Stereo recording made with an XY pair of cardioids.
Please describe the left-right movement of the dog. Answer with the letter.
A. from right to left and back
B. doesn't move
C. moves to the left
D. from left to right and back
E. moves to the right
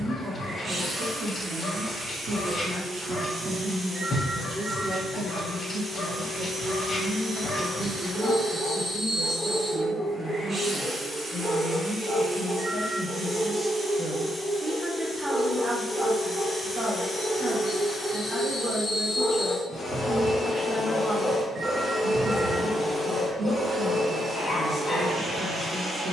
D.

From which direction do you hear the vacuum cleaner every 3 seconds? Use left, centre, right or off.
right, right, right, right, right, centre, left, centre, right.